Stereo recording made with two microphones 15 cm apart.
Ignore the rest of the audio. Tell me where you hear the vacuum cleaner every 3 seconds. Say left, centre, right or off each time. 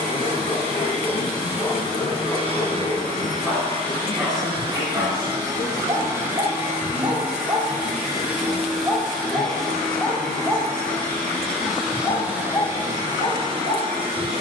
right, right, centre, centre, right.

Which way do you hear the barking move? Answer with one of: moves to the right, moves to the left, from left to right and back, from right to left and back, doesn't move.
from left to right and back.